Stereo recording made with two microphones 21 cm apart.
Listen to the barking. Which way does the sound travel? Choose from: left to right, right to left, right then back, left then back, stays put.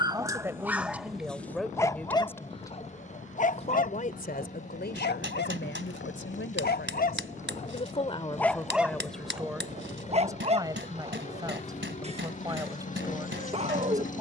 left then back.